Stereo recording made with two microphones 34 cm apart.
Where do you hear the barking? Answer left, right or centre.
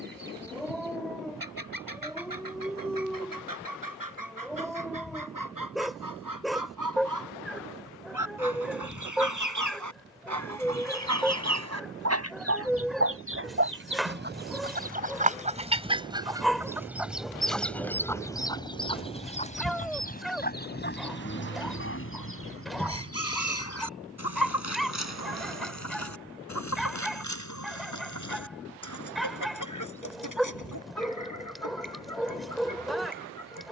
centre.